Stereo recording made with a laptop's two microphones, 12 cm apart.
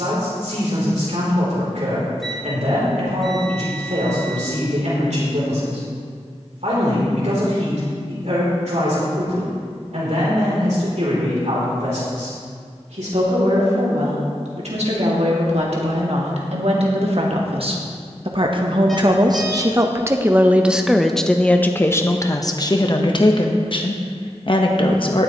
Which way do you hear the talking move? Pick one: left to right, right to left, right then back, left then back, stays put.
right to left.